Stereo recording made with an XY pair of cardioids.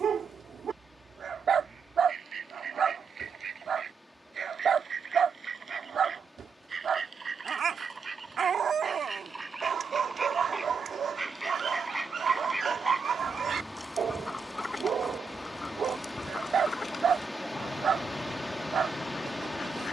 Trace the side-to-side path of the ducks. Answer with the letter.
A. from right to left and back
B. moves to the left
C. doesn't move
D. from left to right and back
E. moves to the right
B.